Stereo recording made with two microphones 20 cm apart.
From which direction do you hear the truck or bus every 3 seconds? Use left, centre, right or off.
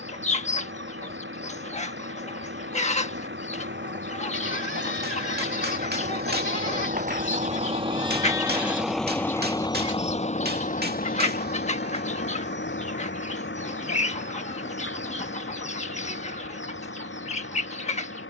right, right, right, left, left, left.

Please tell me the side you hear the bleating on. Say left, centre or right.
left.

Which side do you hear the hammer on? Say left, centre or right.
right.